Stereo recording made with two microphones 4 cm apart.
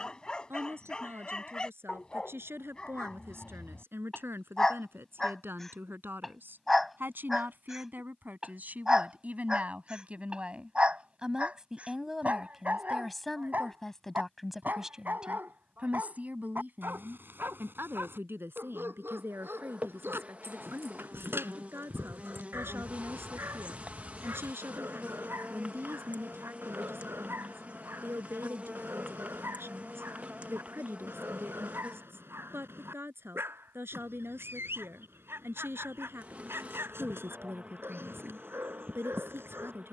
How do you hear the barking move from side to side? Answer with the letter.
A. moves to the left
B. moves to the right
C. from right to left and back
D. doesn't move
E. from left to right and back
B.